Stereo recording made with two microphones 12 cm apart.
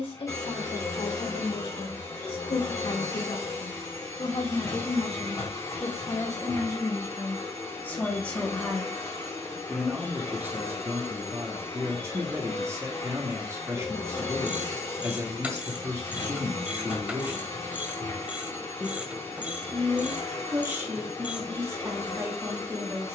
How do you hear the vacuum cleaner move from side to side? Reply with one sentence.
You can hear the vacuum cleaner stay in one place.